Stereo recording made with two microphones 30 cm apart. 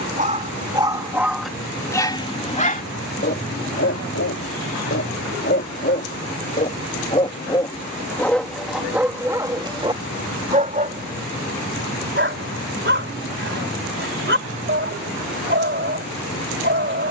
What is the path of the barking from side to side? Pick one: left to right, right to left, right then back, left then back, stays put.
left then back.